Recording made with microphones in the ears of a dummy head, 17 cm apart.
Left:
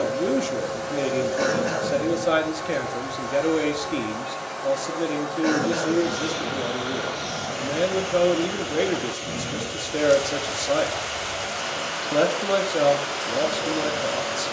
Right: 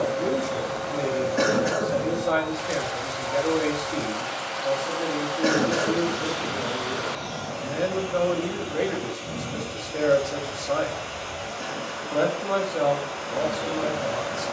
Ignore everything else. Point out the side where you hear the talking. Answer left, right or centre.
left.